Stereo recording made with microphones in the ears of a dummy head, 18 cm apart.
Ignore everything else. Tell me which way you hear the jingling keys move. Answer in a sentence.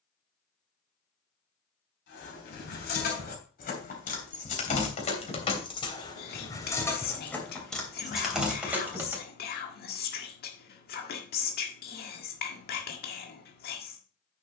You can hear the jingling keys travel towards the right.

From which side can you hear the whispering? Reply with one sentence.
You can hear the whispering on the left.